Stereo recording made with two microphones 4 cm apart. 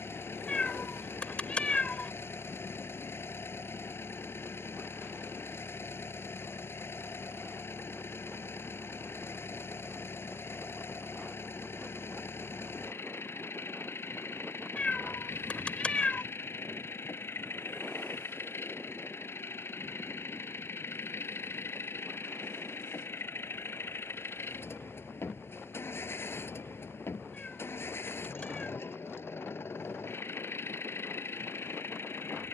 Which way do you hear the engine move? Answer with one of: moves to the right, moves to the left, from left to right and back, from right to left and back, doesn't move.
doesn't move.